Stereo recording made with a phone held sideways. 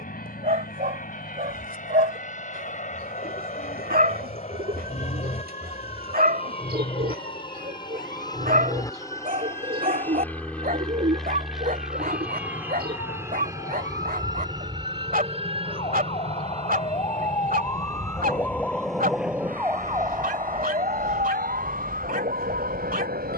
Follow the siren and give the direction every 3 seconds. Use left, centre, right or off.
left, left, left, left, left, left, centre, right.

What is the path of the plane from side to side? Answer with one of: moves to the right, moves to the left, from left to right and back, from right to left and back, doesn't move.
moves to the right.